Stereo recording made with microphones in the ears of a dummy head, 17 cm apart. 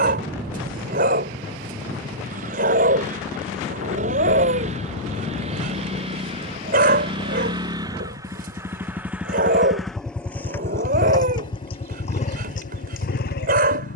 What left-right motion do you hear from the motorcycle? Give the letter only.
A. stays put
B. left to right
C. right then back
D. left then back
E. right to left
E.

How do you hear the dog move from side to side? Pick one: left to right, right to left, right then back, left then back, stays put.
stays put.